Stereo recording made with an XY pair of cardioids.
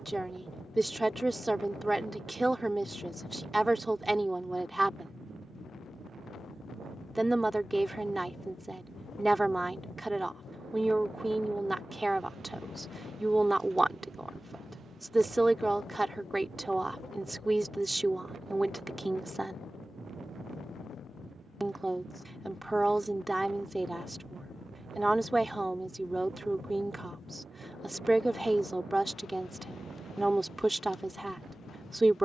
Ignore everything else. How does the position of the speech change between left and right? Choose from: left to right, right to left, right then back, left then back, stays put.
stays put.